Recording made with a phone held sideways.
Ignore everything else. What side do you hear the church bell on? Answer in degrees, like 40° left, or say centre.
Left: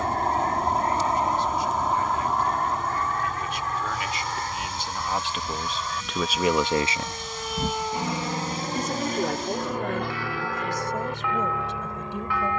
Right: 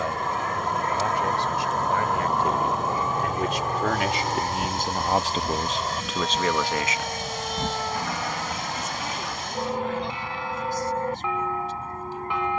20° right.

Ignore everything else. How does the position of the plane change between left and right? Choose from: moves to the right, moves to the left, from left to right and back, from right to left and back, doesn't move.
moves to the left.